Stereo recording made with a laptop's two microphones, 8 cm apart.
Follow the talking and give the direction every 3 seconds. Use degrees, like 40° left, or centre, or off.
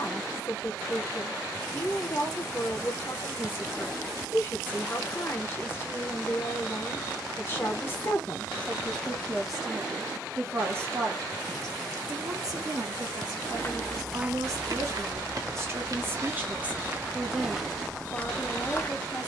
30° left, 30° left, 30° left, 20° right, 50° right, 20° right, 10° left.